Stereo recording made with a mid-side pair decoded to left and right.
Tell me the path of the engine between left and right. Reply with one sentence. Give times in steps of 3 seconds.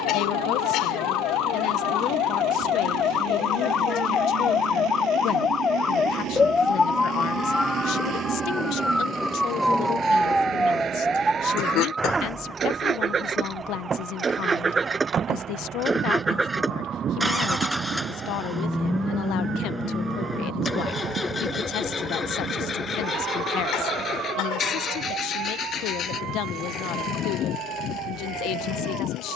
In this clip you hear the engine on the right from 0 s, in the centre from 15 s and on the left from 21 s.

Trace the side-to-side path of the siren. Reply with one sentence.
In this clip you hear the siren go from the left side to the right.